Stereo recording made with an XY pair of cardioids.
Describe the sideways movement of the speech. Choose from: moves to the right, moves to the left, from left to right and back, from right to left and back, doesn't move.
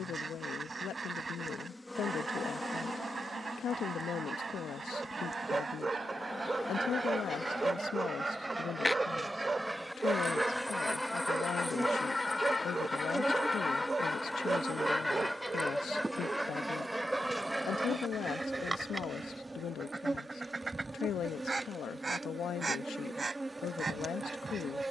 doesn't move.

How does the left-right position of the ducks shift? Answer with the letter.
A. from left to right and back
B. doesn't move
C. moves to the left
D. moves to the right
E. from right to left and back
E.